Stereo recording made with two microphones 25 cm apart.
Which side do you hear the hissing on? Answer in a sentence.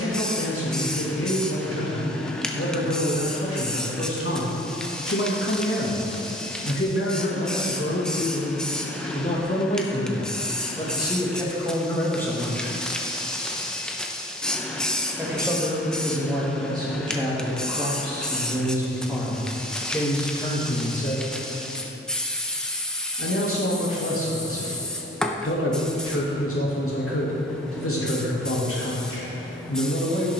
In this clip you hear the hissing in the centre.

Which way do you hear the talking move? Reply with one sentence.
In this clip you hear the talking move from left to right and back again.